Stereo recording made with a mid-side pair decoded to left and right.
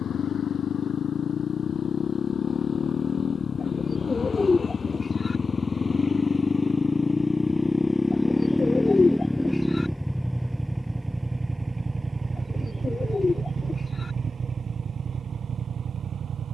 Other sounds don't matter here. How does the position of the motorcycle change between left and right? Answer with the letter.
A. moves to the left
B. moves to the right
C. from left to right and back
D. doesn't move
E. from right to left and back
B.